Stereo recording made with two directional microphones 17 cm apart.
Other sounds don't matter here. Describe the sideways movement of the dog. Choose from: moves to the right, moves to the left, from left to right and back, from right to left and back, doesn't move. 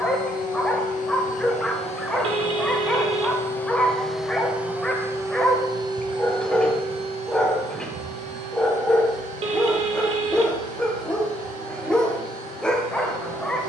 doesn't move.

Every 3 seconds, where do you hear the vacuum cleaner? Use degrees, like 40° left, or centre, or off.
40° left, centre, 40° right, 60° right, 60° right.